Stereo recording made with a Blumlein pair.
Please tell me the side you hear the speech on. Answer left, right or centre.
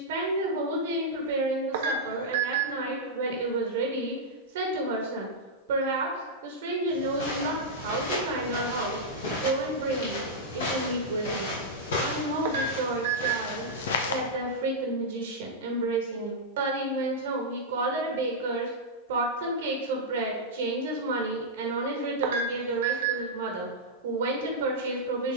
right.